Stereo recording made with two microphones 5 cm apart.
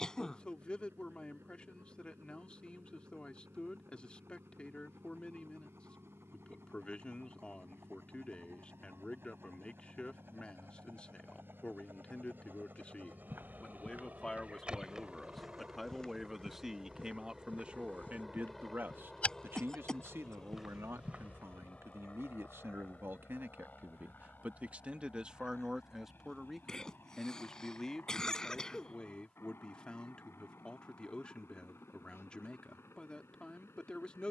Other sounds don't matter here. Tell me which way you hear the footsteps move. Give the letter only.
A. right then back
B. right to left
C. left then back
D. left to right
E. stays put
C.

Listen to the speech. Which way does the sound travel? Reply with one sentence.
In this clip you hear the speech go right and come back.